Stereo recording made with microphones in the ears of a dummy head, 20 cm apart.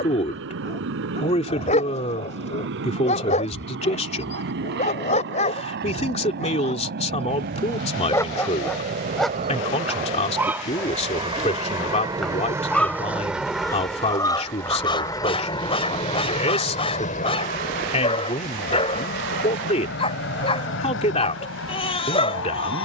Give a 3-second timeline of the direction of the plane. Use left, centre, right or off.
right, right, right, right, centre, left, left, left.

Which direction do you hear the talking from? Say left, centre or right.
left.